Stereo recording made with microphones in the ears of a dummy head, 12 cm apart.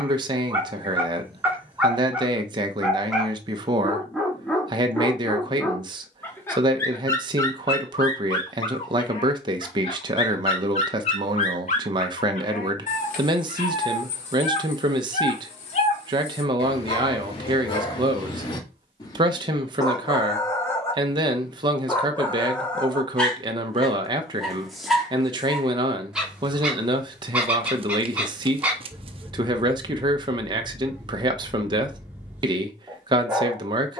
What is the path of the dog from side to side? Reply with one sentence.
You can hear the dog go left and come back.